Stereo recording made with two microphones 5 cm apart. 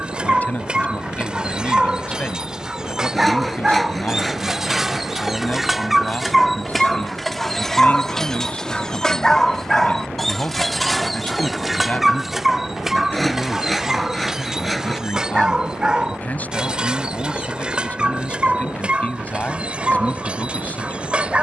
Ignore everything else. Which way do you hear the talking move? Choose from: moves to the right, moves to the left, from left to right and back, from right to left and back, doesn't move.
doesn't move.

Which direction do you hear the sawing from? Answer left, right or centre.
centre.